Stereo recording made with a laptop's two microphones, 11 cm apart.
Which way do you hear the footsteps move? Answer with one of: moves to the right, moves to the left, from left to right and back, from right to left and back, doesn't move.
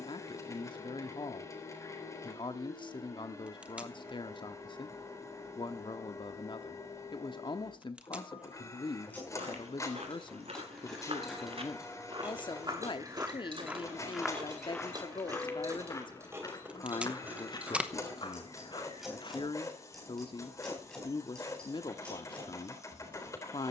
moves to the left.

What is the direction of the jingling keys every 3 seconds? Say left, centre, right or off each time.
off, off, off, centre, right, right, centre, centre.